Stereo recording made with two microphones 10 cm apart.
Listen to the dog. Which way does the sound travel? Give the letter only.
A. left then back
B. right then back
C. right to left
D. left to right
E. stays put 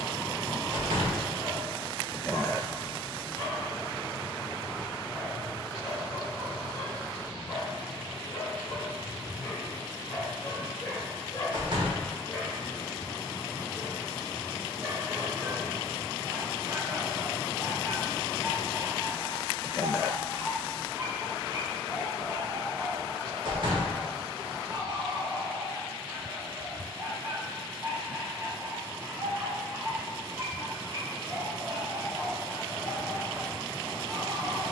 D.